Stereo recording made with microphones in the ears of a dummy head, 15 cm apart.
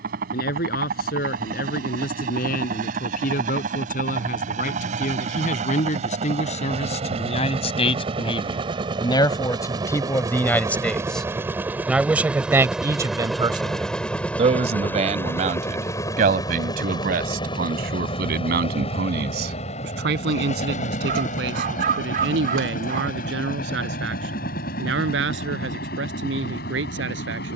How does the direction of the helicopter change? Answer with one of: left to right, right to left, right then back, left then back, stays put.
right to left.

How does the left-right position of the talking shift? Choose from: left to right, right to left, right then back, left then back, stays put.
left to right.